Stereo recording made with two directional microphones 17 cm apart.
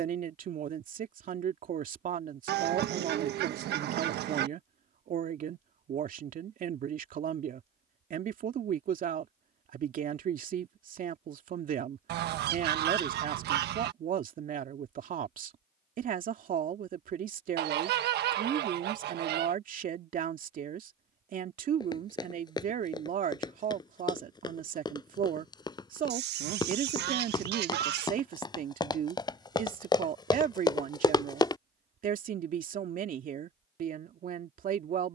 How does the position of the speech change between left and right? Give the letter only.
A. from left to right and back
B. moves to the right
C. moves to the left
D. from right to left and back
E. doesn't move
E.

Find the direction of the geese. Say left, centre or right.
right.